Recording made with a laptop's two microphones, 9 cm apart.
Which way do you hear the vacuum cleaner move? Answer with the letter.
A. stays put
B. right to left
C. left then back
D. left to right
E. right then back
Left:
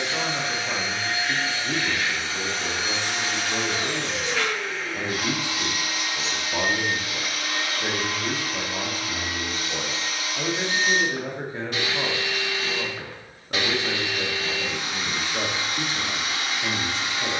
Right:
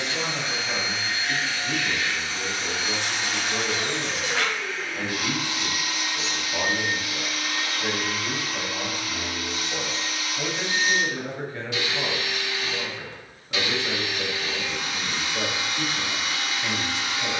A.